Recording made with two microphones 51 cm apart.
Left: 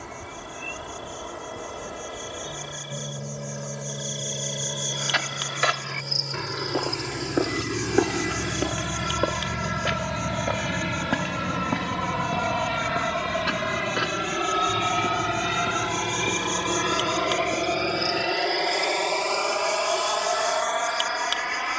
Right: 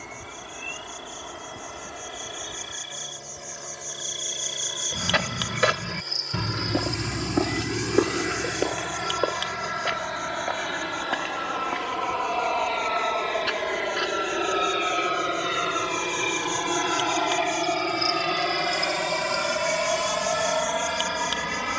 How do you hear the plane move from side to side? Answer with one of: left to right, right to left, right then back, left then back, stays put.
left to right.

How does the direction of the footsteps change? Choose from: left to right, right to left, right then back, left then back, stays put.
right to left.